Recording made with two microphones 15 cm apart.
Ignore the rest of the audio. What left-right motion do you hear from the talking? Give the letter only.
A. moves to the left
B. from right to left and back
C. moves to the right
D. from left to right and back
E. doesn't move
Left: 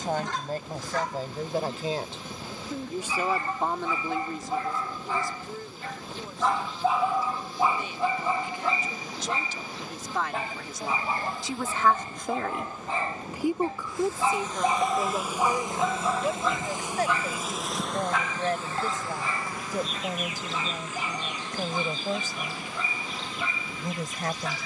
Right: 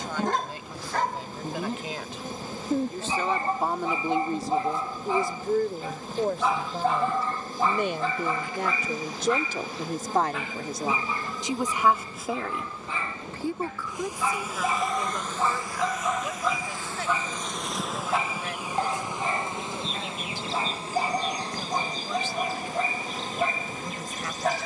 D.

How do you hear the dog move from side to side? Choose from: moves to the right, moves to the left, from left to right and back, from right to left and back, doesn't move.
from right to left and back.